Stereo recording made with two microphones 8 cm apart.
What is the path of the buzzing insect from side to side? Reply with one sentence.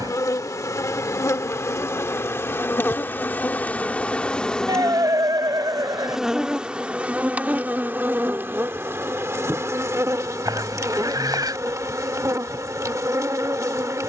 You can hear the buzzing insect travel towards the right.